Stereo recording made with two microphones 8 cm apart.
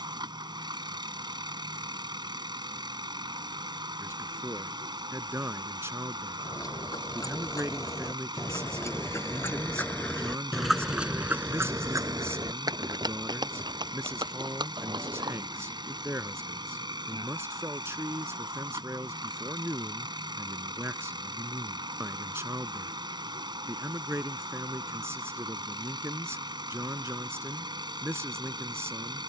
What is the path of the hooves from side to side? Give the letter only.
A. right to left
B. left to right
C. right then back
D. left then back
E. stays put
B.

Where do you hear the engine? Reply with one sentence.
In this clip you hear the engine on the right.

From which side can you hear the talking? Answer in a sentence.
In this clip you hear the talking on the right.